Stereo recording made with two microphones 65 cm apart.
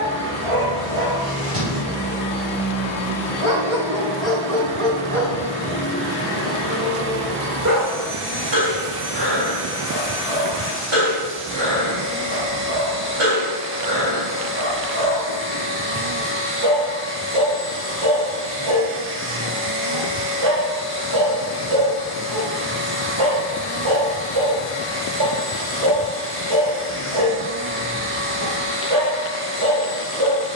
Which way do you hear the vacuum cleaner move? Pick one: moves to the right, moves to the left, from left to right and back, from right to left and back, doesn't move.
doesn't move.